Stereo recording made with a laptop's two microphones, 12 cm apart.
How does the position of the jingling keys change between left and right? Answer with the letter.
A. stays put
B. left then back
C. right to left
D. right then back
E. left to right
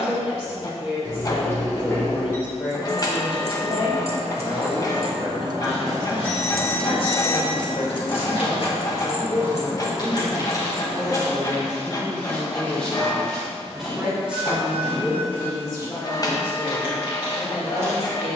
C.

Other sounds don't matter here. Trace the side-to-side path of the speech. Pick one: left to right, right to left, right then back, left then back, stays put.
right then back.